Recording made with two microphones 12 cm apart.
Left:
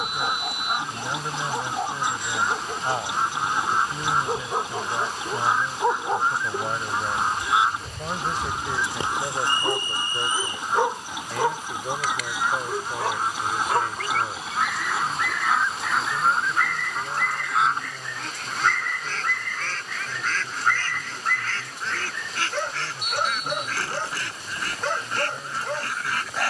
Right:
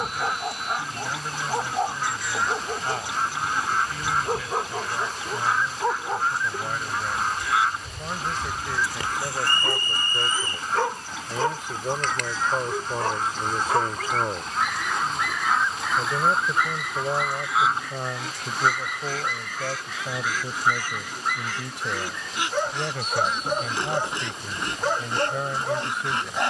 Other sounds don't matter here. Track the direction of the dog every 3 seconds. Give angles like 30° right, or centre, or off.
20° right, centre, 30° left, 20° left, centre, 10° right, 10° right, 10° right, 10° right.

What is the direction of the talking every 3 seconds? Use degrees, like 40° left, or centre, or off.
20° left, 20° left, 20° left, centre, 30° right, 70° right, 80° right, 80° right, 80° right.